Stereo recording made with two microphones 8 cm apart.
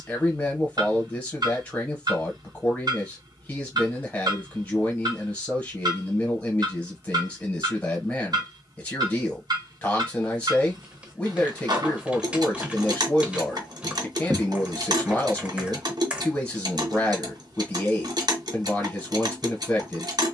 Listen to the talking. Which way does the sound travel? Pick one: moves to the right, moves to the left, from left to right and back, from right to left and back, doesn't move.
doesn't move.